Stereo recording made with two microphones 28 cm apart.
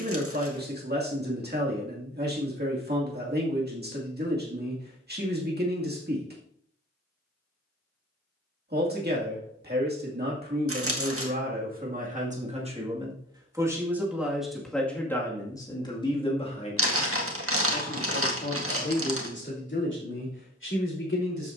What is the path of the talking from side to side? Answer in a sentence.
In this clip you hear the talking travel towards the left.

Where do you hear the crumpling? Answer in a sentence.
In this clip you hear the crumpling on the right.